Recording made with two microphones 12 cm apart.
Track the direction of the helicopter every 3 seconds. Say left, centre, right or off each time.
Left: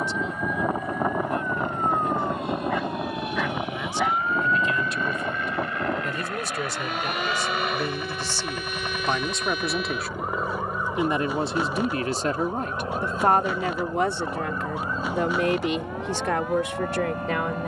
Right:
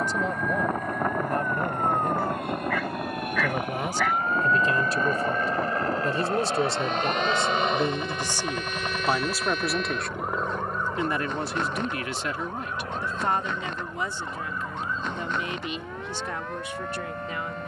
right, right, right, centre, left, left.